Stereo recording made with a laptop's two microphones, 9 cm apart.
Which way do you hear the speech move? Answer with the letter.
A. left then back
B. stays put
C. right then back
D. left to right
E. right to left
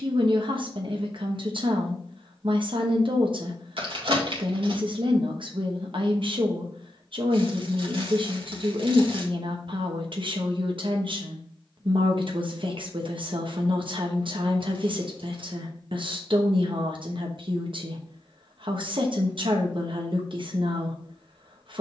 B.